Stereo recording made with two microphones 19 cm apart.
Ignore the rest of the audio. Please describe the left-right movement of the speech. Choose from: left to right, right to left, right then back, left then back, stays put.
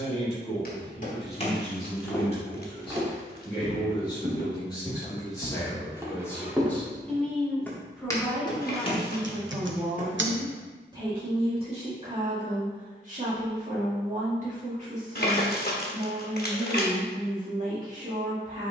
left to right.